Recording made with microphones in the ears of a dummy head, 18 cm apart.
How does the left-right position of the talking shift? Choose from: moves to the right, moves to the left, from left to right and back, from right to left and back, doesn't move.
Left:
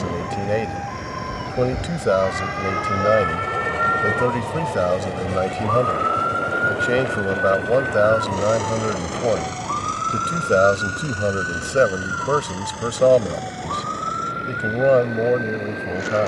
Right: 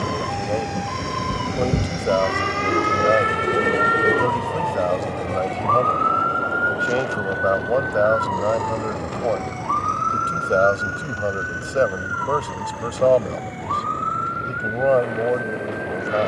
doesn't move.